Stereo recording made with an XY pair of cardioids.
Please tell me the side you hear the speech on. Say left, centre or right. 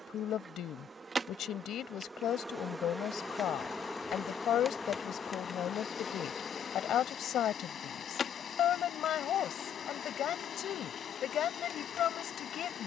left.